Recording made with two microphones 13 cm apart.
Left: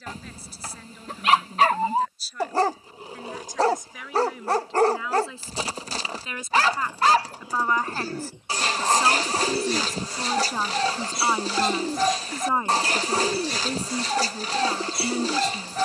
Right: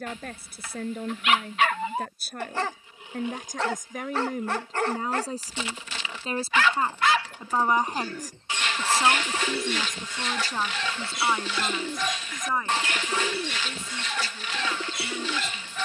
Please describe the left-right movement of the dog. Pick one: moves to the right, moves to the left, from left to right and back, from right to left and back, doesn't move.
doesn't move.